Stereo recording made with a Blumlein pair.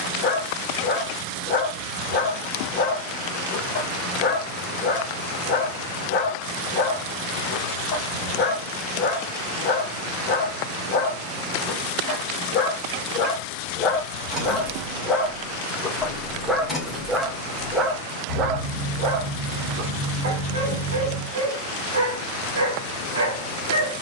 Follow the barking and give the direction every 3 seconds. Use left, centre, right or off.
left, left, left, left, left, centre, right, right.